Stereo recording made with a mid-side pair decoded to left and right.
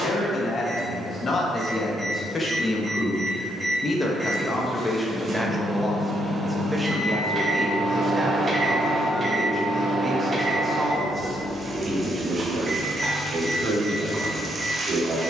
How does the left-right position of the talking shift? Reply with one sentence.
You can hear the talking move from left to right.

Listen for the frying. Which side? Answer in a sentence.
In this clip you hear the frying on the right.